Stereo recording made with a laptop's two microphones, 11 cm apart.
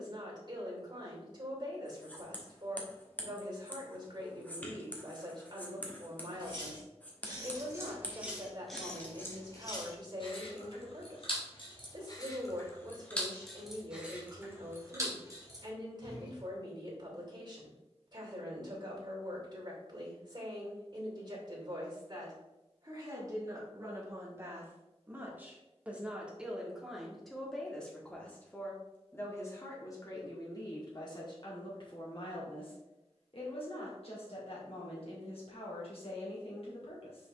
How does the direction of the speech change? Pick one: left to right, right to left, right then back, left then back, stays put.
right to left.